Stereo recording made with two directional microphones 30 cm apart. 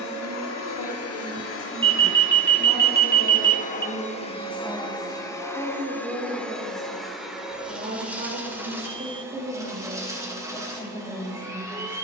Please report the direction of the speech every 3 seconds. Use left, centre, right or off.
left, centre, right, centre.